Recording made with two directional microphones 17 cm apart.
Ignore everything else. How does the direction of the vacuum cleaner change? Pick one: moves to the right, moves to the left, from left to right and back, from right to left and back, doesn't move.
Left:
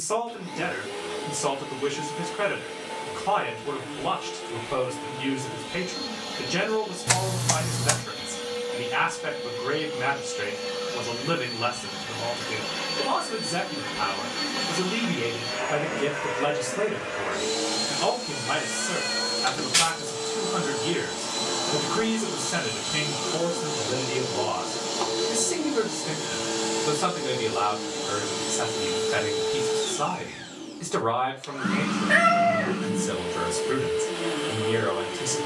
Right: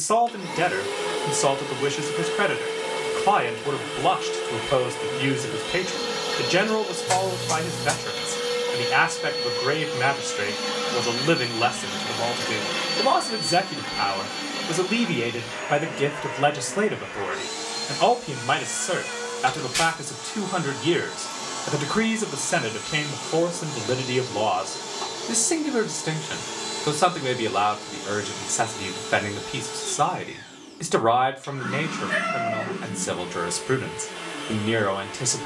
moves to the left.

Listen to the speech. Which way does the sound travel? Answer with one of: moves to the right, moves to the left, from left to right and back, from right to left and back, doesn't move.
doesn't move.